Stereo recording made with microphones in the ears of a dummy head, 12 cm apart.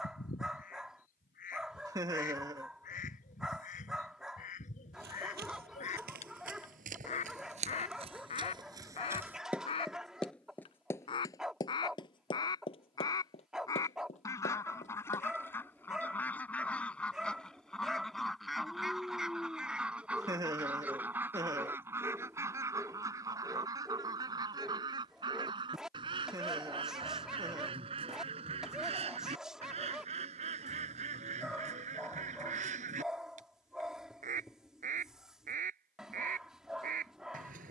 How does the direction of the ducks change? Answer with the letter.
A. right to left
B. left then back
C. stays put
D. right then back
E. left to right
E.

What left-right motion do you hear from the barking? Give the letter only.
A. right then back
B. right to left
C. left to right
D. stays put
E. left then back
D.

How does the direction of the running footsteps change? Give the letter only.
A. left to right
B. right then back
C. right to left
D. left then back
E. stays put
C.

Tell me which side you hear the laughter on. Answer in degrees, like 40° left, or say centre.
20° right.